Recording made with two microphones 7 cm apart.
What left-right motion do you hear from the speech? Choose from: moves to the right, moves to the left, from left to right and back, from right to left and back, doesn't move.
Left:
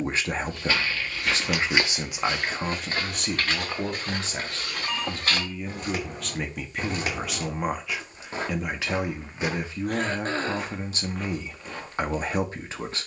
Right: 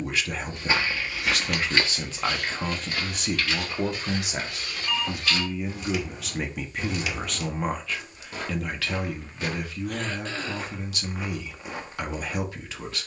from left to right and back.